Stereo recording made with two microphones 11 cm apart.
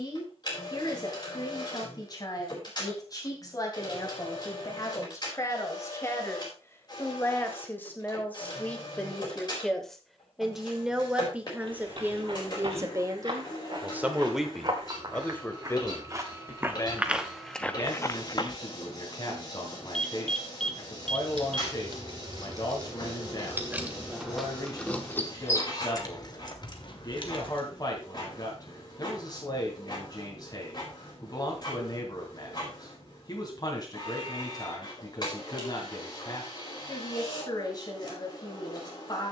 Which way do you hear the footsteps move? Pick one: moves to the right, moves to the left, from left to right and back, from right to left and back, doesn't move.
moves to the left.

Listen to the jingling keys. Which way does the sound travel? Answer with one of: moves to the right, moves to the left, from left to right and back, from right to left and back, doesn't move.
moves to the left.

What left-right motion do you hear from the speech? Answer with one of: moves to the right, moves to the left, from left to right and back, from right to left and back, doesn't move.
from left to right and back.